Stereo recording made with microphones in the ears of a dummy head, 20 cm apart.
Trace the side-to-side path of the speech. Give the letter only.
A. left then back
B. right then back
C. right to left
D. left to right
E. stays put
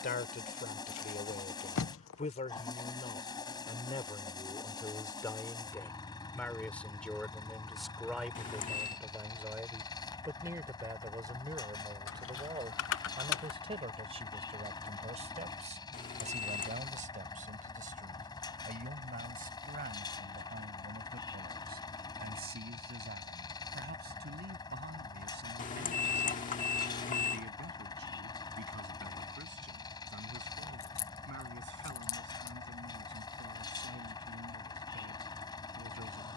D.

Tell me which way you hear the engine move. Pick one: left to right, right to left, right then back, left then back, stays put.
stays put.